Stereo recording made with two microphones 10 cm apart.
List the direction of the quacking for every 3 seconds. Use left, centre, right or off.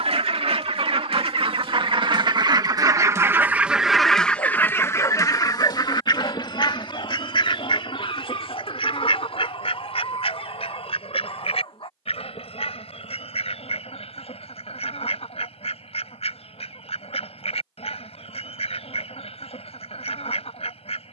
right, centre, left, left, left, left, left.